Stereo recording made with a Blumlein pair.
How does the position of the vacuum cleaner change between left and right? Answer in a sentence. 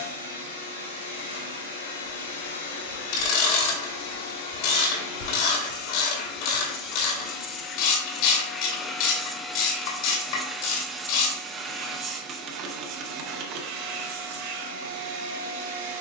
You can hear the vacuum cleaner travel towards the right.